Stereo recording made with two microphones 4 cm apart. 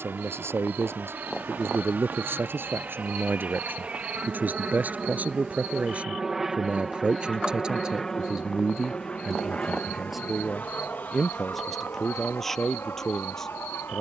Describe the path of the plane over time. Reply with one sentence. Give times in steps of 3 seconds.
You can hear the plane on the right from 0 s, in the centre from 6 s and on the left from 9 s.